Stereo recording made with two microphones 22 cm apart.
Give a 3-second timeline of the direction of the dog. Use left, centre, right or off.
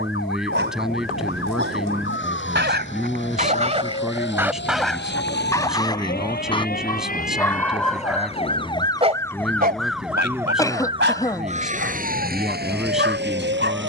right, centre, centre, right, right.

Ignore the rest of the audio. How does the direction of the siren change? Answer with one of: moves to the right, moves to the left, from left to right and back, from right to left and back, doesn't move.
moves to the right.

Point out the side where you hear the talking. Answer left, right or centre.
centre.